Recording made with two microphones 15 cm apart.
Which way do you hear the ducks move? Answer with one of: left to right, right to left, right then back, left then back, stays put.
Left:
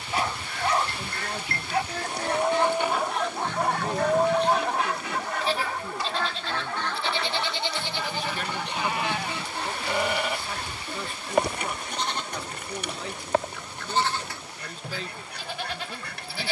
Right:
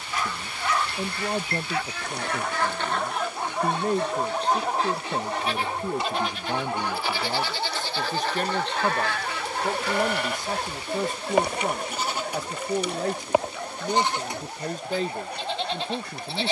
right then back.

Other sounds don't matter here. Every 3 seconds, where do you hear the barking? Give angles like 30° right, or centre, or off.
20° left, 10° right, 30° right, 50° right, 60° right, 60° right.